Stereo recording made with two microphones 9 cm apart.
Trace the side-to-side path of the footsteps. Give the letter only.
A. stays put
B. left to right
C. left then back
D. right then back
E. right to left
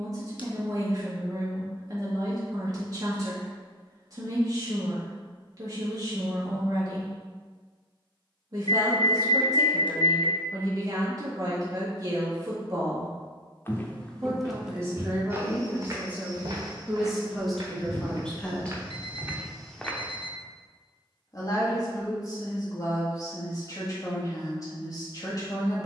D.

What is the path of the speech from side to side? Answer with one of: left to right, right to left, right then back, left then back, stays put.
right to left.